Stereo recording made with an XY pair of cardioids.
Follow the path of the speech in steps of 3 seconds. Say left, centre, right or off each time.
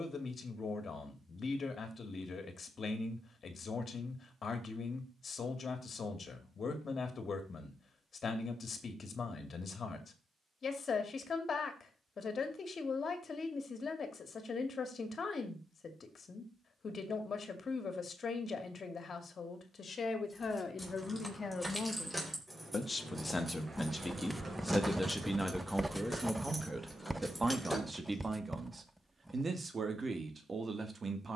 left, left, left, left, left, left, left, left, centre, right, right.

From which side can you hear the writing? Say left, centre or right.
centre.